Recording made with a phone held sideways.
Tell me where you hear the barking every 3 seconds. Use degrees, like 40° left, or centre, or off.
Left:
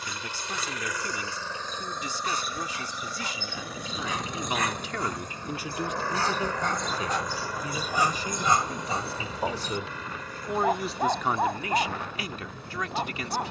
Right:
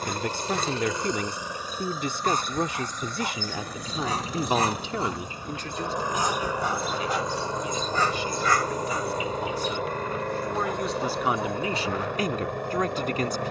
50° right, 30° right, centre, 50° left, 70° left.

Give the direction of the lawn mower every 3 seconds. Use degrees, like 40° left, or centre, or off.
20° right, centre, 30° right, 60° right, 70° right.